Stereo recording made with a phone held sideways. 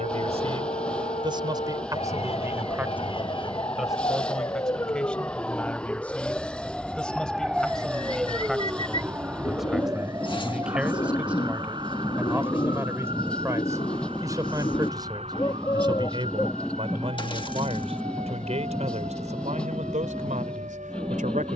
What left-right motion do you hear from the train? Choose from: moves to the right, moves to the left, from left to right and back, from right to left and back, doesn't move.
doesn't move.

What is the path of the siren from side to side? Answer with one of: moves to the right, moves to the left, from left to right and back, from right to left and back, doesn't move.
moves to the right.